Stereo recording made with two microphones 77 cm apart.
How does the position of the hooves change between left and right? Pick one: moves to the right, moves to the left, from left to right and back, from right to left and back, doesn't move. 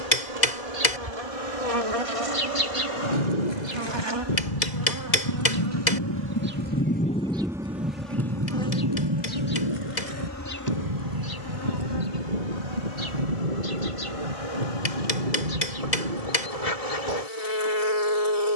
moves to the right.